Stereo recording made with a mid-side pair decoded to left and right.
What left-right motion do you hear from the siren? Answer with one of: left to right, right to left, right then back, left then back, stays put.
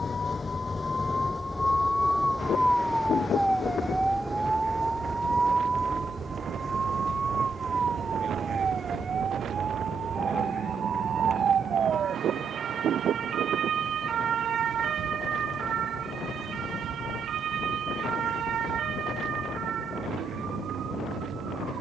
left to right.